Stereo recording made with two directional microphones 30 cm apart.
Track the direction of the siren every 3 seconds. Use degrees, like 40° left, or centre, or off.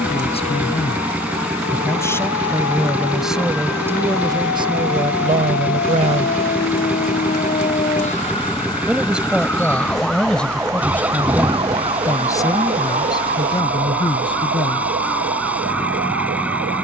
60° left, 50° left, 30° left, centre, 30° right, 50° right.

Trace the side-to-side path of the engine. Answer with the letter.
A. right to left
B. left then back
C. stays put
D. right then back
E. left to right
C.